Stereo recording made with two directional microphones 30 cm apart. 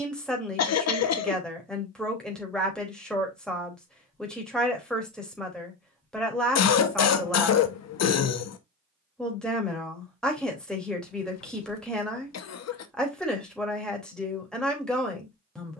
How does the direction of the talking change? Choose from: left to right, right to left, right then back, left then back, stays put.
stays put.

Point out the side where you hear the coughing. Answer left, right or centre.
left.